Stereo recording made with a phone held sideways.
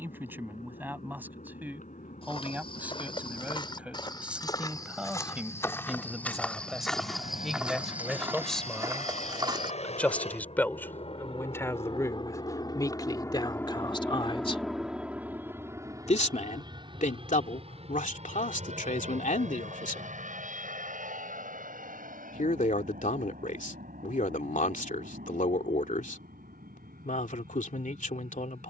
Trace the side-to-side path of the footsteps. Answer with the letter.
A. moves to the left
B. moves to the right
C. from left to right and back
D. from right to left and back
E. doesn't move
B.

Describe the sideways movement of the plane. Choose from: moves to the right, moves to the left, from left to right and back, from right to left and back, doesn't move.
moves to the right.